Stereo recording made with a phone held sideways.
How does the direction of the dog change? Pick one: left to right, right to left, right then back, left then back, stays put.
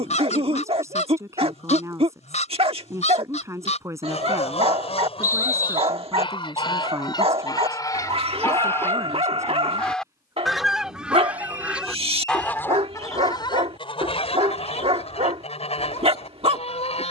stays put.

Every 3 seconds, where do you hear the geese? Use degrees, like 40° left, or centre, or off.
40° left, 40° left, 20° left, centre, 30° left, 40° left.